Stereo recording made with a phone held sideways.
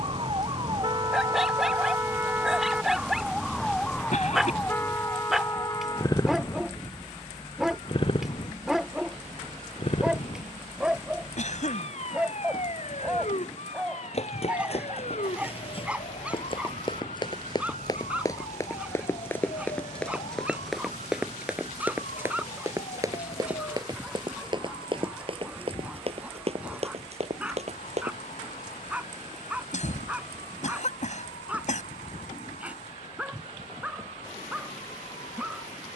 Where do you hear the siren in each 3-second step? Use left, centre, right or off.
right, centre, left, left, left, left, left, left, off, left, left, left.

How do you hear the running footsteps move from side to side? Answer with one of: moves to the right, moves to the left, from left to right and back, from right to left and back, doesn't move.
moves to the right.